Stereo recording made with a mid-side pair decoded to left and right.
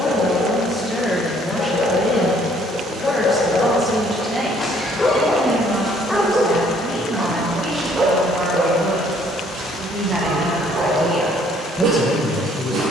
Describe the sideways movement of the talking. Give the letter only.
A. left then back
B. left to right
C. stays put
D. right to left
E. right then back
E.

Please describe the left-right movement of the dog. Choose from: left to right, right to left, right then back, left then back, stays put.
left to right.